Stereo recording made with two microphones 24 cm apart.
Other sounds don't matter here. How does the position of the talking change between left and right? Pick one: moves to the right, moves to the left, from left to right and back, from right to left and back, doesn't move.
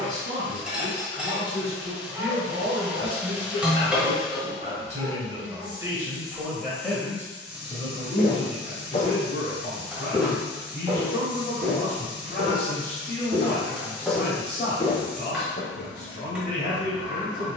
moves to the left.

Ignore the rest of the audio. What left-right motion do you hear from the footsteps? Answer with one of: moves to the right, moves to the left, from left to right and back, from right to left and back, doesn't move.
from left to right and back.